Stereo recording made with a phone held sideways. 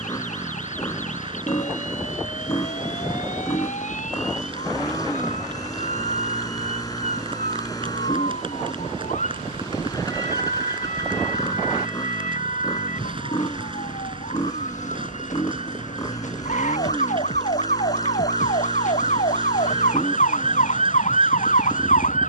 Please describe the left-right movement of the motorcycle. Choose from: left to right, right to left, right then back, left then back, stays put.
stays put.